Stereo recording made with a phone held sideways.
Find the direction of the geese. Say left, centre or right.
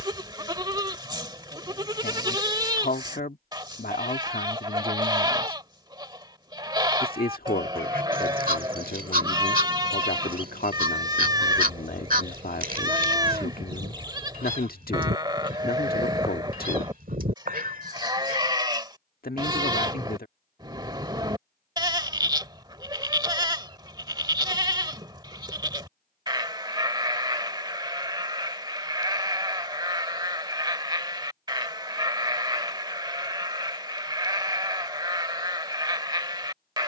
right.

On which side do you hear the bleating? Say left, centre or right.
right.